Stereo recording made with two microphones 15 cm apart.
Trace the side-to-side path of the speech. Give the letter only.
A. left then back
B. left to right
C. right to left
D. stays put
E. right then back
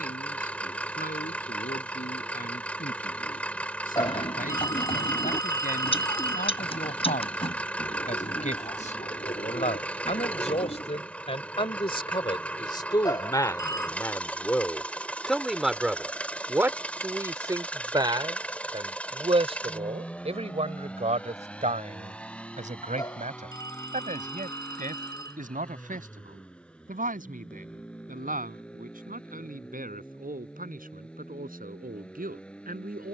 B.